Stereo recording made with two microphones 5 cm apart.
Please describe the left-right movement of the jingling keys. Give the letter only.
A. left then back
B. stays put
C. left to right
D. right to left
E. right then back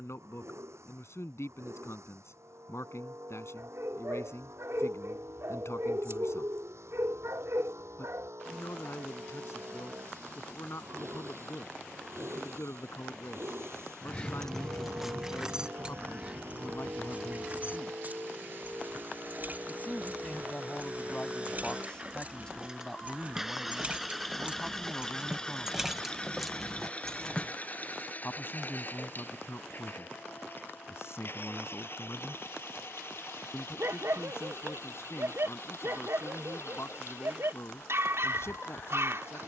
E.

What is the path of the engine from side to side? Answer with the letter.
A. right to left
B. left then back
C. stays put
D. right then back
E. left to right
A.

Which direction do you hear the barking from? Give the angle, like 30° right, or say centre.
70° right.